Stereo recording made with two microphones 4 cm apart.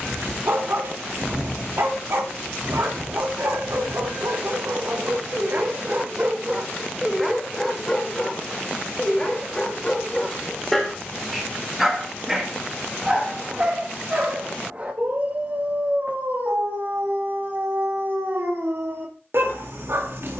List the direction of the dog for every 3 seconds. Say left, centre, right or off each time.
right, right, centre, centre, right, right, right.